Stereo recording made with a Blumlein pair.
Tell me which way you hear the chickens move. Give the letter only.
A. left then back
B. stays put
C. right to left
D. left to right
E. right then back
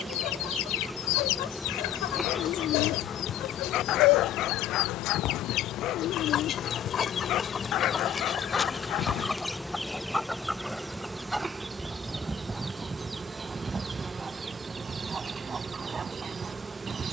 D.